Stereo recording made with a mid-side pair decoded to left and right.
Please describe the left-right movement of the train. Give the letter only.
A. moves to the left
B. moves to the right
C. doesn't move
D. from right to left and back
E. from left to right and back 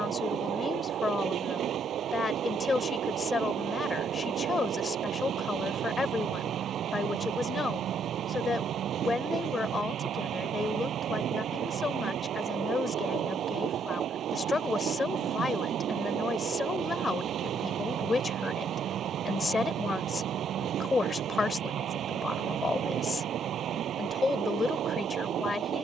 C.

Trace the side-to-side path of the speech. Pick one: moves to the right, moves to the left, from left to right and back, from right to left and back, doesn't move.
doesn't move.